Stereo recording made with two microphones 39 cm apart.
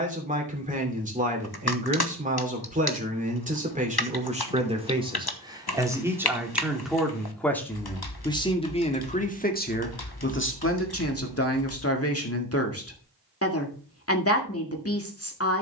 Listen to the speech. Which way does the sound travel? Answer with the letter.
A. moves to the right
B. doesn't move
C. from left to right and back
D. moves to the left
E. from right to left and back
D.